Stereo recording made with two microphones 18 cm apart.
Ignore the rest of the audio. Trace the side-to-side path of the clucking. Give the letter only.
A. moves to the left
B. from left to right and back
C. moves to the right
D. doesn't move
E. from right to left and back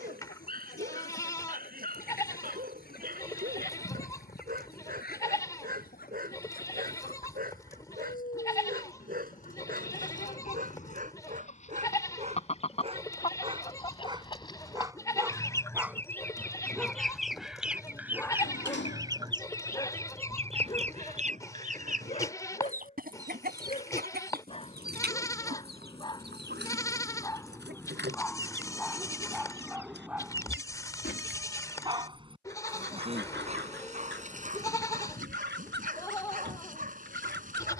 C.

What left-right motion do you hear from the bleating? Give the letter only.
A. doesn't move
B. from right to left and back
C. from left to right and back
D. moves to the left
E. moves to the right
A.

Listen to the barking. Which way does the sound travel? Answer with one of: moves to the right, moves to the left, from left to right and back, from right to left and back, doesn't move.
from right to left and back.